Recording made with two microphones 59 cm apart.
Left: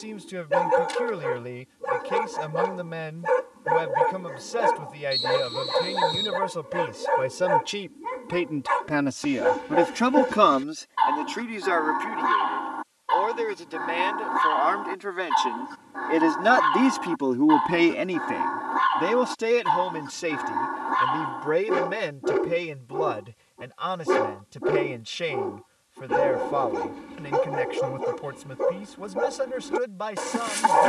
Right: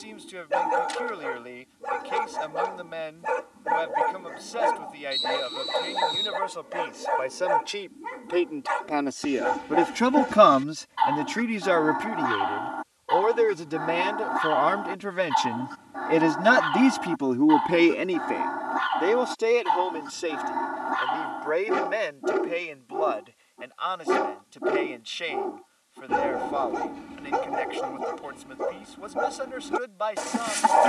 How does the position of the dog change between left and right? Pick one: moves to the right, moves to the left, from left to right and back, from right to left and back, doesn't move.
doesn't move.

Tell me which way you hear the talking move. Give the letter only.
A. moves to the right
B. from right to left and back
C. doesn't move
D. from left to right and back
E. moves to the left
D.